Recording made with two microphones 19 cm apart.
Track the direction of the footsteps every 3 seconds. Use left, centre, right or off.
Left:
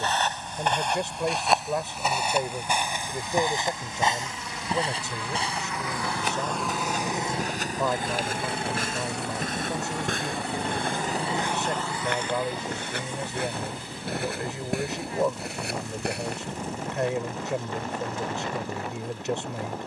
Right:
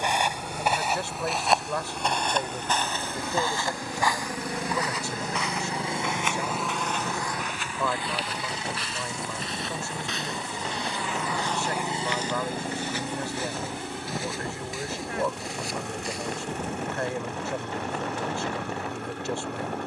centre, left, left, left, left, left, off.